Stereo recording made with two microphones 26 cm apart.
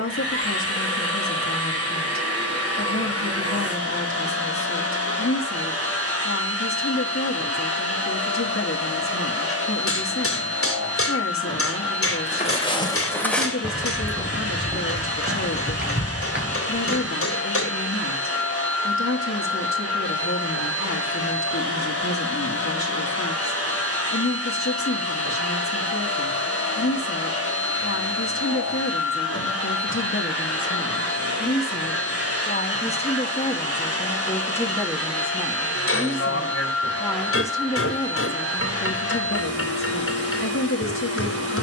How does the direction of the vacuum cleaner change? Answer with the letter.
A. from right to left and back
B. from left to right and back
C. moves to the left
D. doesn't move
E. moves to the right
D.